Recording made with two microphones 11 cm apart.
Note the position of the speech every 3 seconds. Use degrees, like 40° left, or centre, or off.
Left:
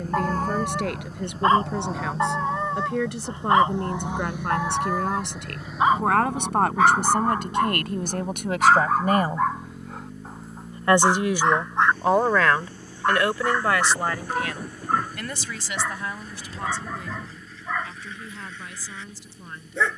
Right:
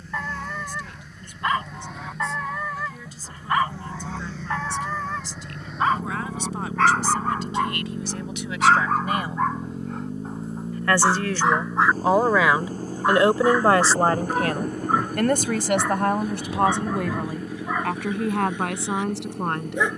70° left, 70° left, 60° left, 20° left, 30° right, 60° right, 70° right.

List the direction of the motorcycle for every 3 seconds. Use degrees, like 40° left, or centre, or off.
40° left, 10° left, 10° right, 30° right, 40° right, 50° right, 60° right.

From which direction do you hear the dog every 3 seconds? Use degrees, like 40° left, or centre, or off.
30° left, 20° left, 10° left, centre, 10° right, 10° right, 10° right.